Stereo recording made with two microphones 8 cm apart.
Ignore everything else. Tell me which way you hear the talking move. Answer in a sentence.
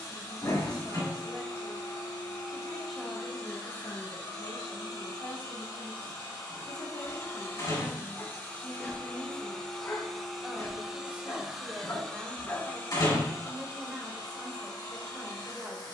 You can hear the talking move from right to left and back again.